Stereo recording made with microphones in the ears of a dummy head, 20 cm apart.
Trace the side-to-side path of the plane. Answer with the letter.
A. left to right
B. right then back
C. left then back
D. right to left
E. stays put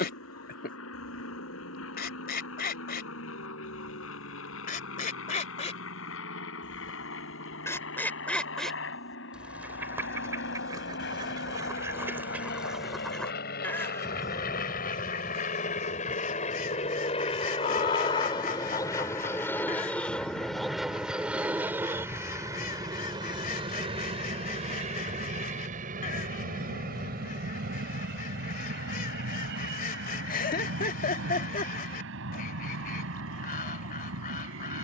A.